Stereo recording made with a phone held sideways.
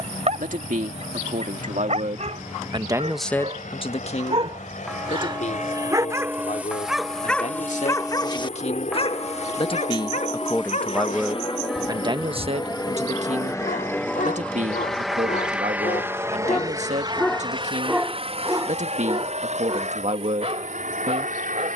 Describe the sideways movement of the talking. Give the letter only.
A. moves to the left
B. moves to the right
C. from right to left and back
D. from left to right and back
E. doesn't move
C.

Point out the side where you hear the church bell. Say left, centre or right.
centre.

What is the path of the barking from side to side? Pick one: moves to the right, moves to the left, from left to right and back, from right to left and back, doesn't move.
from right to left and back.